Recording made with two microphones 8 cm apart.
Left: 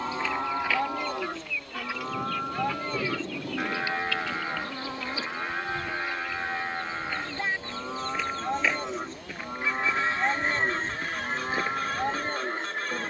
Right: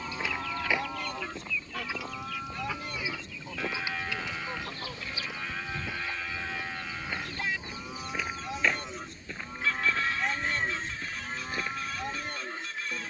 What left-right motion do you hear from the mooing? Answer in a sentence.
You can hear the mooing stay put.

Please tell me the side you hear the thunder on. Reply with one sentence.
In this clip you hear the thunder on the left.